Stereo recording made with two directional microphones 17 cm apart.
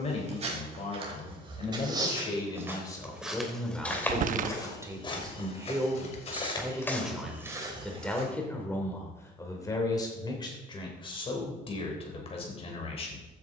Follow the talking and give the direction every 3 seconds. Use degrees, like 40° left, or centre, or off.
30° left, 10° right, centre, 30° left, 40° left.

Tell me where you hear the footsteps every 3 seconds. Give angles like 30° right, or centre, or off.
30° right, 20° left, centre, off, off.